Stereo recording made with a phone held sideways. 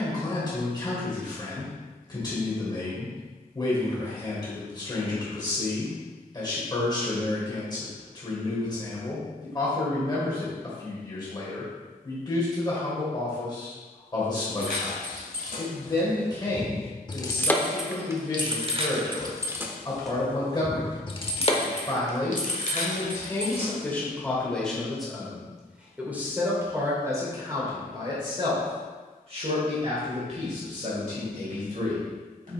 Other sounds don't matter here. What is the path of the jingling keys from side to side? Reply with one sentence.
You can hear the jingling keys go right and come back.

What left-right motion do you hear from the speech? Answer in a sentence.
You can hear the speech move to the right.